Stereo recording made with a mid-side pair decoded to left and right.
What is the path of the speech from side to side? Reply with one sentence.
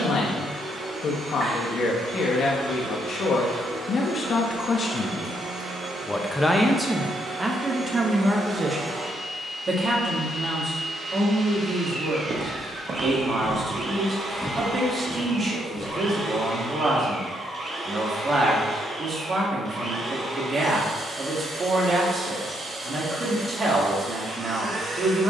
In this clip you hear the speech travel towards the right.